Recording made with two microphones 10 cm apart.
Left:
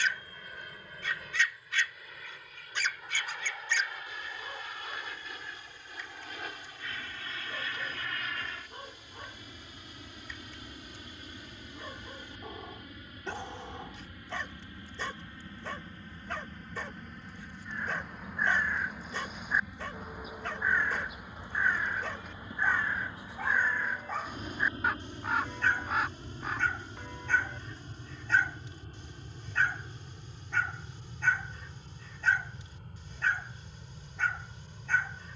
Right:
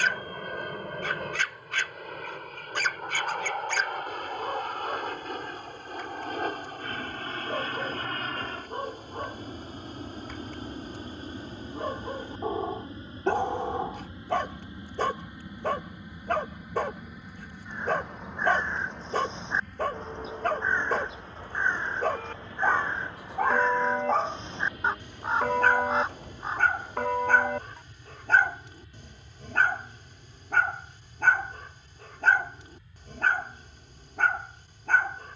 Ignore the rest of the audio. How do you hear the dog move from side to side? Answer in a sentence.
In this clip you hear the dog stay in one place.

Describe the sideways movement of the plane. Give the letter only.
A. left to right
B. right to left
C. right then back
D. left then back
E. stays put
B.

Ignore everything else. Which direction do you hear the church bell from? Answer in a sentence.
You can hear the church bell on the right.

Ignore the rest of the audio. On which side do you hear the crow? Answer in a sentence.
In this clip you hear the crow on the right.